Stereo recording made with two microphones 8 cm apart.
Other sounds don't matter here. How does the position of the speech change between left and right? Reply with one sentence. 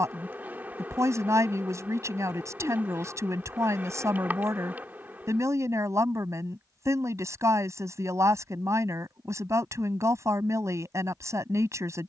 You can hear the speech stay in one place.